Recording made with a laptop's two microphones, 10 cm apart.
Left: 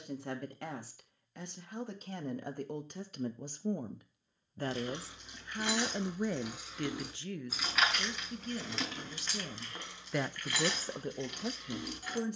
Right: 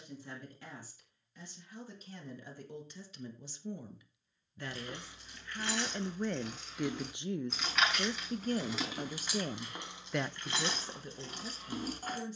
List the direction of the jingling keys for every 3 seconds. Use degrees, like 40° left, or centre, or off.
off, 20° left, centre, 30° right.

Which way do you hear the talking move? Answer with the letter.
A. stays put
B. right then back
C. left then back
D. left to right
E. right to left
B.